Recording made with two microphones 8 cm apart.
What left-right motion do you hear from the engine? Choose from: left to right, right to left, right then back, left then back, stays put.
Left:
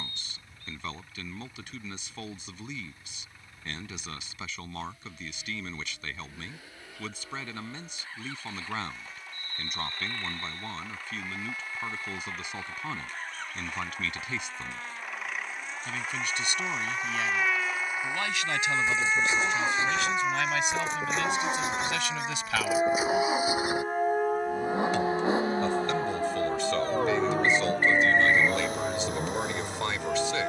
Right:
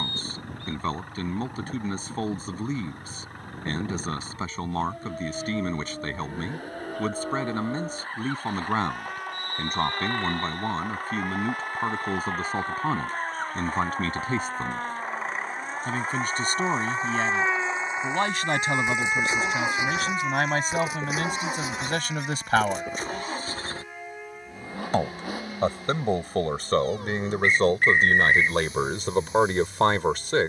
right to left.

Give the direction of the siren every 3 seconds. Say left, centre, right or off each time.
right, right, right, right, right, right, centre, left, left, left.